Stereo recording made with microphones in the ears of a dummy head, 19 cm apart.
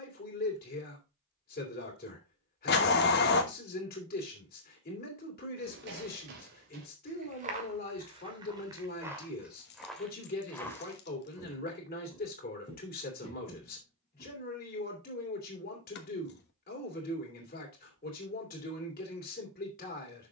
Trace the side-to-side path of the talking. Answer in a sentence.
In this clip you hear the talking stay in one place.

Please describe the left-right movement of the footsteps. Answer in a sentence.
In this clip you hear the footsteps move to the left.